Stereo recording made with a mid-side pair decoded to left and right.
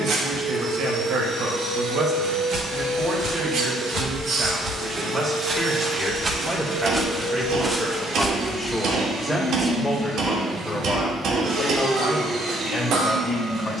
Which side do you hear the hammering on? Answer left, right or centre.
right.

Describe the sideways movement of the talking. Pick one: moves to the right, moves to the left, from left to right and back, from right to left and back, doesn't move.
moves to the left.